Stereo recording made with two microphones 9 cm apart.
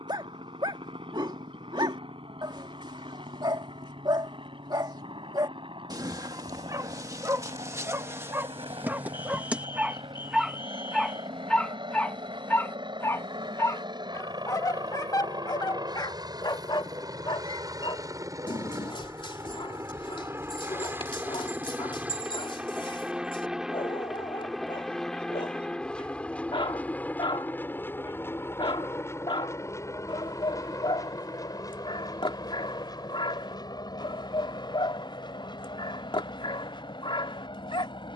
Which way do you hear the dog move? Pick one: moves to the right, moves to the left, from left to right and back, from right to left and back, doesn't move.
moves to the left.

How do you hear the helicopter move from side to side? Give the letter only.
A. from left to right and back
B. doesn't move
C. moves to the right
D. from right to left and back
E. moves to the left
E.